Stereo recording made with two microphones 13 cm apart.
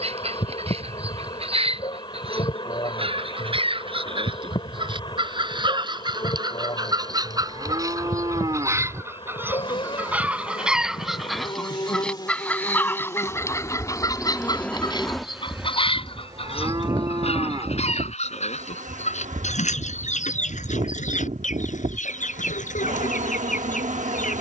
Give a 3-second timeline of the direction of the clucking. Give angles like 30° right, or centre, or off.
50° right, 40° right, 30° right, 10° right, 20° left, 50° left, 70° left, 70° left.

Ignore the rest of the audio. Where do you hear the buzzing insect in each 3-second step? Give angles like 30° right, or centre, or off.
40° left, 40° left, 40° left, 40° left, 20° left, 30° right, 70° right, 70° right.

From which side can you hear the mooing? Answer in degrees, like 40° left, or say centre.
30° right.